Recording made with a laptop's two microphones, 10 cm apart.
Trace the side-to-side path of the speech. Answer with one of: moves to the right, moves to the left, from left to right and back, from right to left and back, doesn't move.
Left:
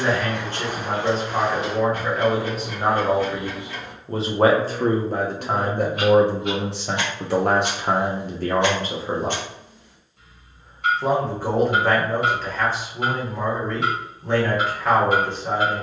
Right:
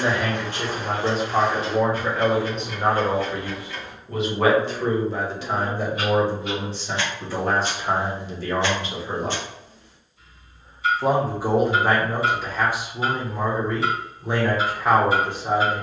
from right to left and back.